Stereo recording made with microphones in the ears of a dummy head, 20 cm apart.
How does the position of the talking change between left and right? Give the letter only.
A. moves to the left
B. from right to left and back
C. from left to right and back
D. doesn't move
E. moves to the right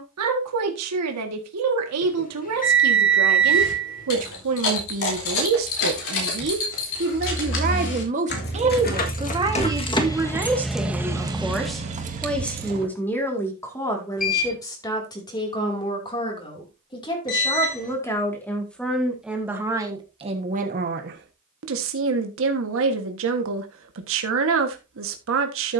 B.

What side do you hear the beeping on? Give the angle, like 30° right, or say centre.
40° left.